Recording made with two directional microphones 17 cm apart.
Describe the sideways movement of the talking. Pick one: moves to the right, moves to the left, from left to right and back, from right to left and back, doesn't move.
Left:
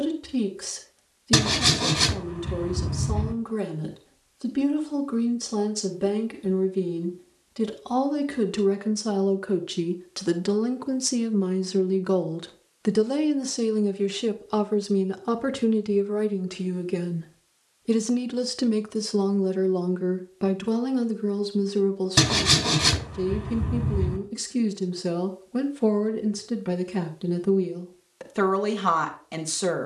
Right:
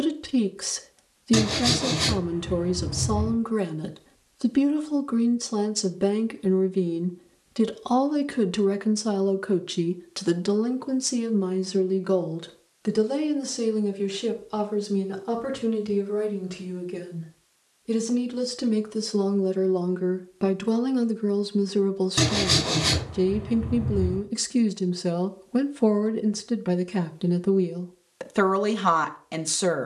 from right to left and back.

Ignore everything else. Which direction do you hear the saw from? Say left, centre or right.
left.